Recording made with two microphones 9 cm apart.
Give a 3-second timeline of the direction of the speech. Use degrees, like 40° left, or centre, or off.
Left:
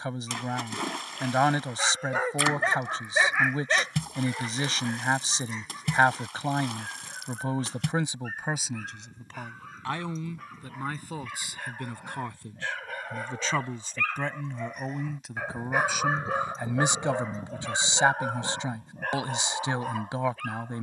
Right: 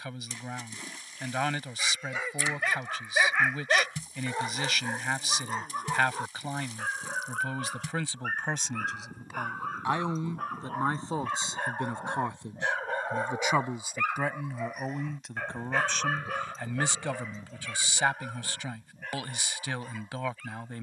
30° left, 30° left, 20° left, 20° right, 10° right, 10° left, 20° left.